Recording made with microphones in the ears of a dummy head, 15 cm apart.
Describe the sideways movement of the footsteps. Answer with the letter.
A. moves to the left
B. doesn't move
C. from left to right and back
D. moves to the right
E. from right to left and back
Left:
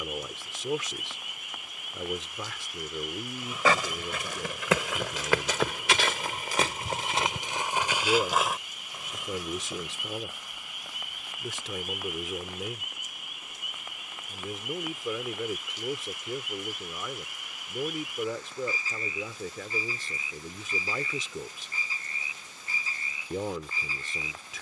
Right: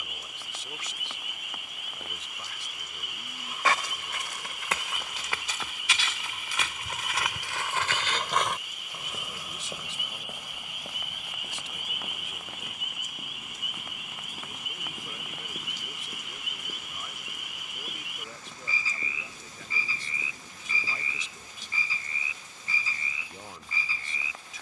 D.